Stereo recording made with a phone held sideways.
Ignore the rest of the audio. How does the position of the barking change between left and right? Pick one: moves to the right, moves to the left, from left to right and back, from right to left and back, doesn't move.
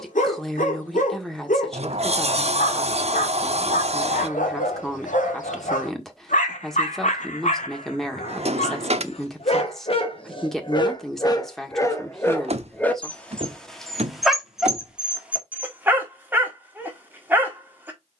moves to the right.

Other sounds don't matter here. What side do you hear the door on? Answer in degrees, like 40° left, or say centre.
50° right.